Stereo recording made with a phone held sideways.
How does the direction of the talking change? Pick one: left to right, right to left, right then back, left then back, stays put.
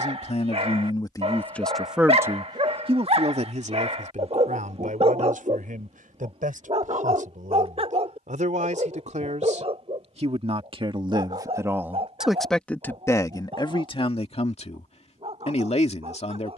right then back.